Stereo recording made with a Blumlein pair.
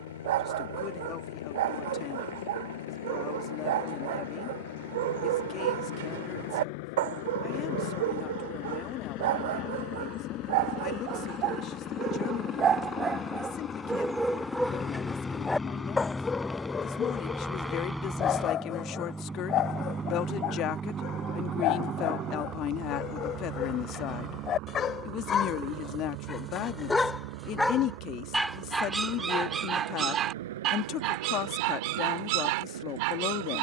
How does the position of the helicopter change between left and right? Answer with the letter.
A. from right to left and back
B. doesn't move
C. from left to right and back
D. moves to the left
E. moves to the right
E.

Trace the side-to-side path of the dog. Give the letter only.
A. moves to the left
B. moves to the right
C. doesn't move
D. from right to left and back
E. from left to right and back
D.